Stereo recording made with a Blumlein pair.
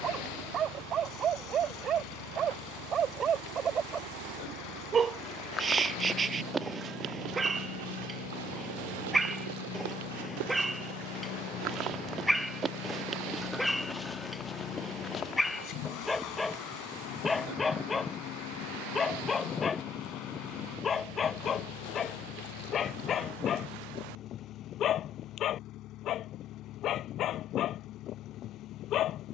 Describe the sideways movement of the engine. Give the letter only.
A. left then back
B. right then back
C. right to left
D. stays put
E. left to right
D.